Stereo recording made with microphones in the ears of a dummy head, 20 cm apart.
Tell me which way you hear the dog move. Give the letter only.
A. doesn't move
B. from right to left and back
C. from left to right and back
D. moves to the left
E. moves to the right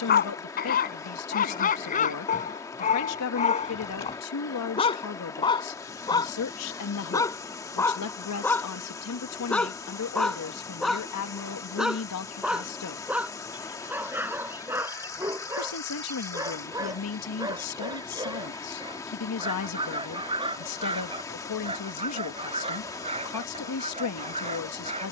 E.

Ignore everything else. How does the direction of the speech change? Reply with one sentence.
In this clip you hear the speech stay put.